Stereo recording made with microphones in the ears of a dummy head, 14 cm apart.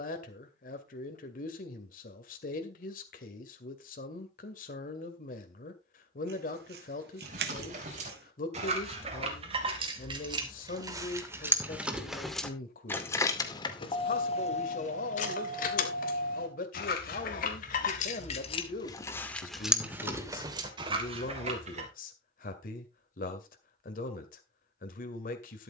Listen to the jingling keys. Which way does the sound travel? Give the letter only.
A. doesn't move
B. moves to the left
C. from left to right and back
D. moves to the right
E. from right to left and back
E.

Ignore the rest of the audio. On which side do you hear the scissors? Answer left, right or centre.
right.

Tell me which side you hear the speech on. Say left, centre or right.
left.